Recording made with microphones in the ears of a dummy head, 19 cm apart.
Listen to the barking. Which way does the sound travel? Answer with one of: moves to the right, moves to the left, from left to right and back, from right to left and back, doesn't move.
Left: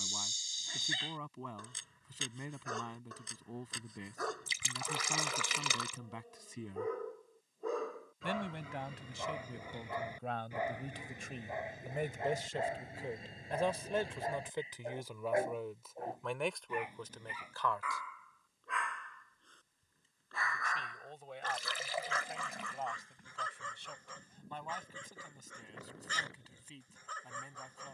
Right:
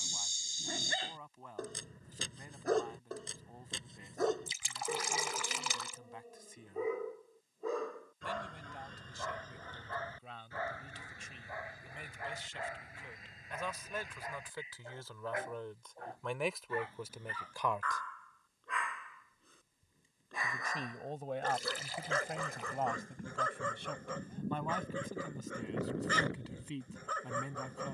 from right to left and back.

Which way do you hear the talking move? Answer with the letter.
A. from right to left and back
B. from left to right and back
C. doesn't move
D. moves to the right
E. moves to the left
D.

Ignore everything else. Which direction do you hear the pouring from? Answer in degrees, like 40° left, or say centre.
70° left.